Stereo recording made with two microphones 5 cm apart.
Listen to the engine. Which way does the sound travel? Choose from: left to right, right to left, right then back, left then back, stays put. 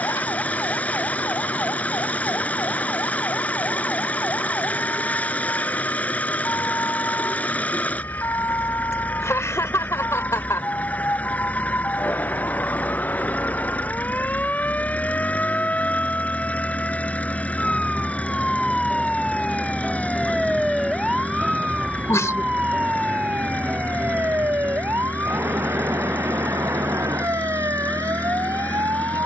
stays put.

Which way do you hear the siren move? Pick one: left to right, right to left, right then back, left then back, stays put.
left to right.